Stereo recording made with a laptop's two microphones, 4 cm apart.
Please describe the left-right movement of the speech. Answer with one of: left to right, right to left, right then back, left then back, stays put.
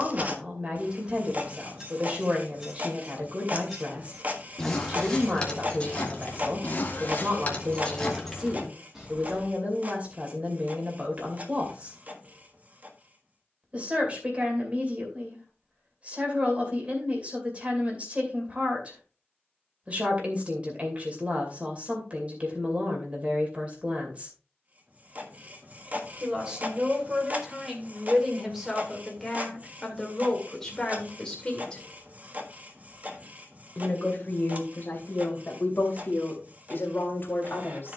right to left.